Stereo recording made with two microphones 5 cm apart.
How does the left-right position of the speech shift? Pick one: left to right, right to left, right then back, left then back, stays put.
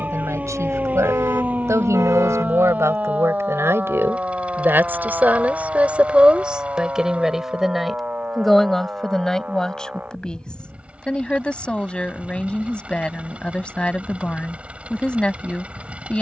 right to left.